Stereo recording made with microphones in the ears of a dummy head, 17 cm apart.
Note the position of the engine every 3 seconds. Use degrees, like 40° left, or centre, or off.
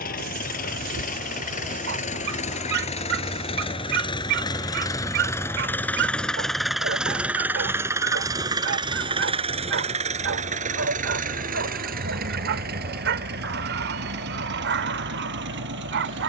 40° left, 20° left, 10° right, 40° right, 60° right, 70° right.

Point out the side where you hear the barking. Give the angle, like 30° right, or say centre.
70° right.